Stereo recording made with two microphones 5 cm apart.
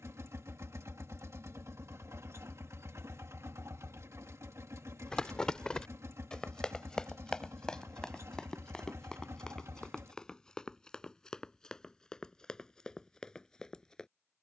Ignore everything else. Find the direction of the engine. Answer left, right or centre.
right.